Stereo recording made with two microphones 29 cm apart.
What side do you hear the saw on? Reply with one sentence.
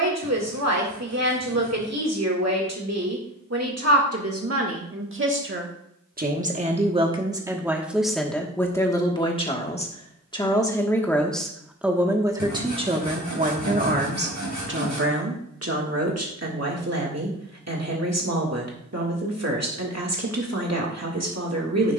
In this clip you hear the saw on the right.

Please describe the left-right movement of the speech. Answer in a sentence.
You can hear the speech move from right to left and back again.